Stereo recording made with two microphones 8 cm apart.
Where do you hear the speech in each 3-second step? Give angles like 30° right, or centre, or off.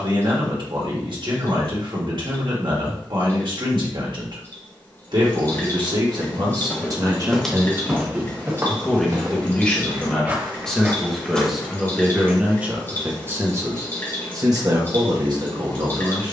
60° right, 60° right, 30° right, 10° left, 30° right, 50° right.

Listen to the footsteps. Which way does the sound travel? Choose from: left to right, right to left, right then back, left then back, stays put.
right then back.